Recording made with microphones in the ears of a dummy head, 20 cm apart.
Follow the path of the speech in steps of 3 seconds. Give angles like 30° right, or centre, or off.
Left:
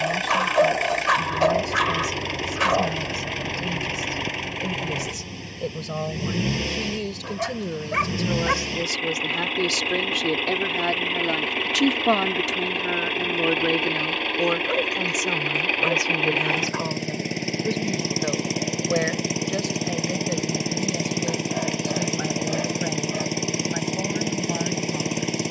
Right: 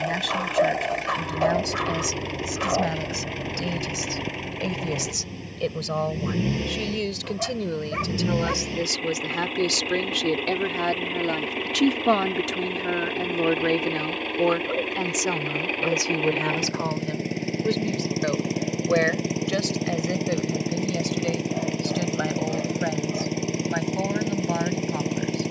30° right, 20° right, 20° right, centre, centre, 10° right, 20° right, 20° right, 30° right.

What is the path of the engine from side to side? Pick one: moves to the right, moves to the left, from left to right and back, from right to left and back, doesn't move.
doesn't move.